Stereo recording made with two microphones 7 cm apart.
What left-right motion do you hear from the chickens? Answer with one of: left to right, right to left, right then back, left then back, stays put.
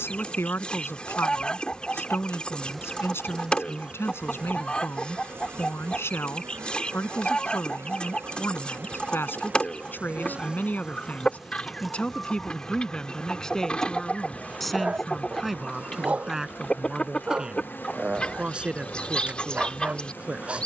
stays put.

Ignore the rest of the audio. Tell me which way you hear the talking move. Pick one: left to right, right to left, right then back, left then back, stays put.
left to right.